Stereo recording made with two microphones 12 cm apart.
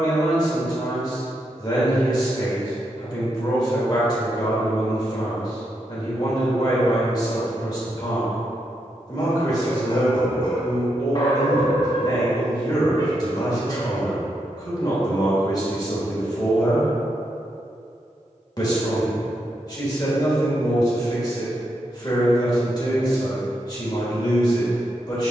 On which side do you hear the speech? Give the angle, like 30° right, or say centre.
30° left.